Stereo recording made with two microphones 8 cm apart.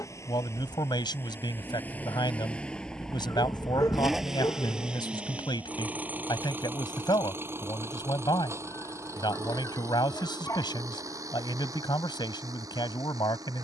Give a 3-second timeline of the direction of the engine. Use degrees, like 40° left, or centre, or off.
30° left, 10° right, 30° right, 40° right, 50° right.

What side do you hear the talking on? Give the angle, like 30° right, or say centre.
80° left.